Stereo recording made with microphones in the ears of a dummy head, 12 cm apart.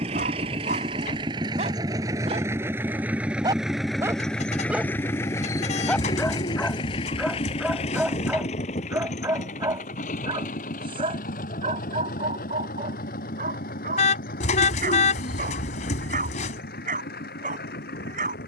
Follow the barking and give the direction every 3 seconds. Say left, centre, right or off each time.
right, centre, centre, right, right, right.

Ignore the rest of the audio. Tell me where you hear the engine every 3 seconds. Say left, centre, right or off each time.
right, centre, left, left, left, left.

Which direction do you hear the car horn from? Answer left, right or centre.
left.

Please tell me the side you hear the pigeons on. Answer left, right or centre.
left.